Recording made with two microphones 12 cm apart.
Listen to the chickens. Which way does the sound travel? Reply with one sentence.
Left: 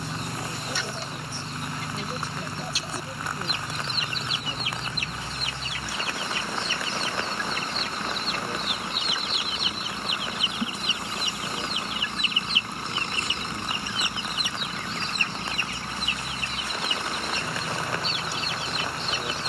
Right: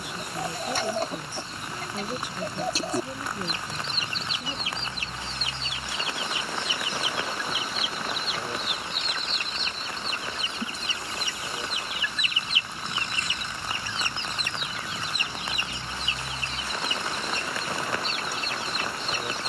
In this clip you hear the chickens move from right to left and back again.